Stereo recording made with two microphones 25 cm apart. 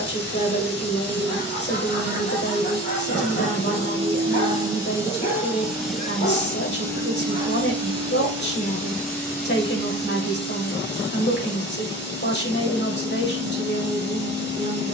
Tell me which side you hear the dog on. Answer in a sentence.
You can hear the dog on the left.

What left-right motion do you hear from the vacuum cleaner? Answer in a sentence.
In this clip you hear the vacuum cleaner move to the left.